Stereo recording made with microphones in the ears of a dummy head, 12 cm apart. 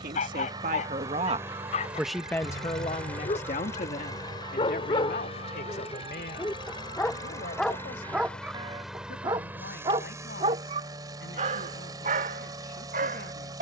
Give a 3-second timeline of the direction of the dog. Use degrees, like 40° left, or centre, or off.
50° left, 40° left, centre, 40° right, 60° right.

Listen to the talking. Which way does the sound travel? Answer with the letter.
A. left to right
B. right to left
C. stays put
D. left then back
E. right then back
B.